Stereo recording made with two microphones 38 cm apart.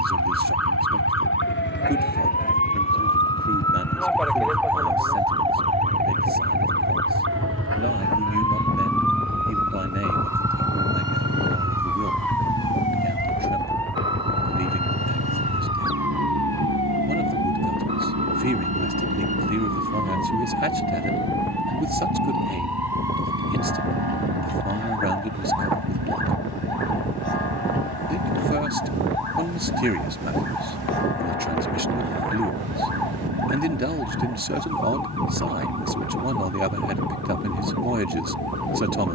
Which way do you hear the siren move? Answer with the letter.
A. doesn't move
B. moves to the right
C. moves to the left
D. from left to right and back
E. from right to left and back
B.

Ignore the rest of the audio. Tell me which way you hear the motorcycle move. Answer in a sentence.
In this clip you hear the motorcycle move to the right.